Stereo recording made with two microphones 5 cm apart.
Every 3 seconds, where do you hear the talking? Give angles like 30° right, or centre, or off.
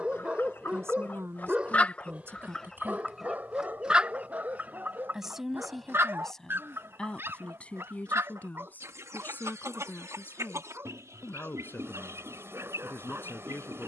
50° right, 10° right, 20° left, 40° left, 40° left.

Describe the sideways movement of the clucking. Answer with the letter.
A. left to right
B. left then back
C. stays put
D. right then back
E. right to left
A.